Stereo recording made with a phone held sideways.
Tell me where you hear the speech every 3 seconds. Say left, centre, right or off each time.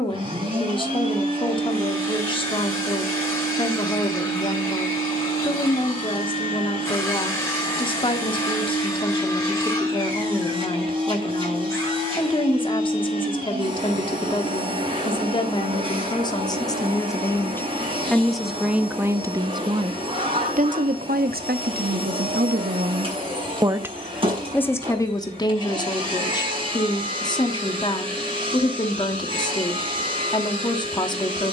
left, left, left, left, left, left, right, right, left, left, left.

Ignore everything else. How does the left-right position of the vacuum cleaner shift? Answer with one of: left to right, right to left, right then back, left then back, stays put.
stays put.